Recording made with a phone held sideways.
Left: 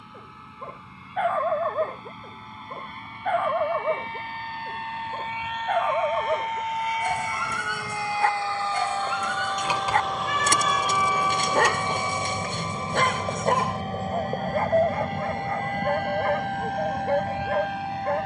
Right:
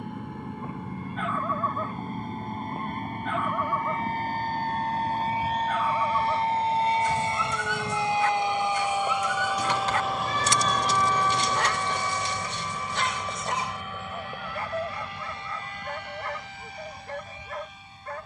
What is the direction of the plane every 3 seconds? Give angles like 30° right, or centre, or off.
50° right, 40° right, 20° right, centre, 30° left, 50° left.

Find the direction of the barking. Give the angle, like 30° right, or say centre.
50° left.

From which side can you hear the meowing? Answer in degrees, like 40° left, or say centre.
30° right.